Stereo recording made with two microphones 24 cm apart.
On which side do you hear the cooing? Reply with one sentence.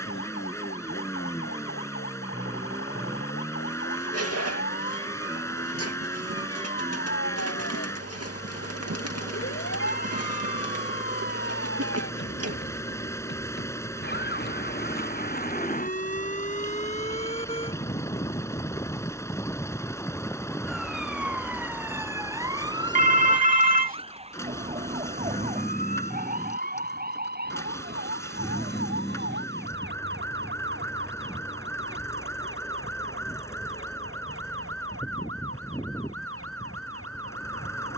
In this clip you hear the cooing on the right.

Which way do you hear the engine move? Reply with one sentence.
You can hear the engine stay in one place.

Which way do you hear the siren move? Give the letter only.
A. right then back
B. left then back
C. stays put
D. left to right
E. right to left
D.